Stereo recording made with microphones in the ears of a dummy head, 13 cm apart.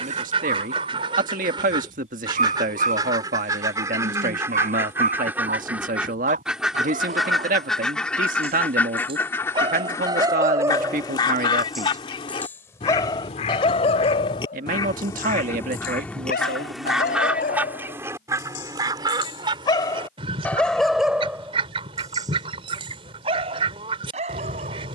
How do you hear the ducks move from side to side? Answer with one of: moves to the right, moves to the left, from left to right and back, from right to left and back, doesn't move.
from right to left and back.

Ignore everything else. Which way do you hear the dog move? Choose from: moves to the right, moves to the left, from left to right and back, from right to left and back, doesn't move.
from right to left and back.